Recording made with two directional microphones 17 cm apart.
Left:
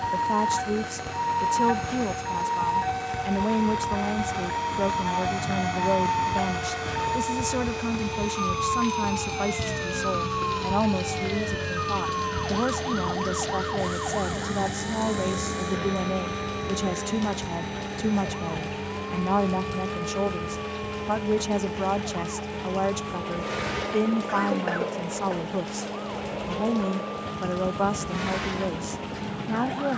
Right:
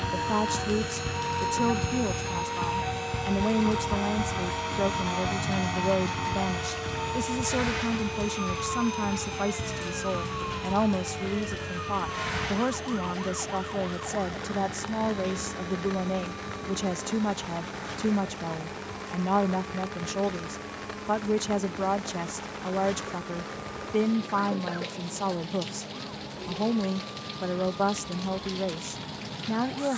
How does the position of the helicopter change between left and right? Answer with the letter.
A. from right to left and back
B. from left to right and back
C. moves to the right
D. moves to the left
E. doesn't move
D.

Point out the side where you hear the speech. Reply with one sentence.
In this clip you hear the speech in the centre.